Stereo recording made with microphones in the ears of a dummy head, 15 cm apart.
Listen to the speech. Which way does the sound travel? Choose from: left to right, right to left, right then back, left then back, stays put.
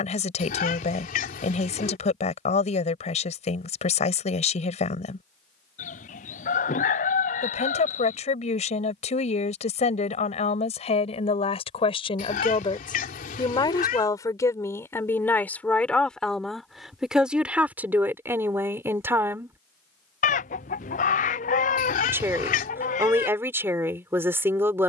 left to right.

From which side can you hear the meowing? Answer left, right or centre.
left.